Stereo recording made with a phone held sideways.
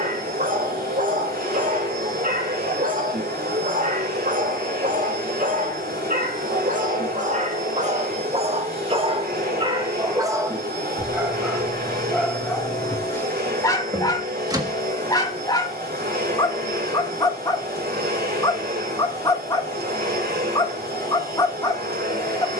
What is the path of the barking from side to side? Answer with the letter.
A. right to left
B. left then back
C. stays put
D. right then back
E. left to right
A.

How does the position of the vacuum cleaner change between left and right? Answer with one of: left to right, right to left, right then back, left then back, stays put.
stays put.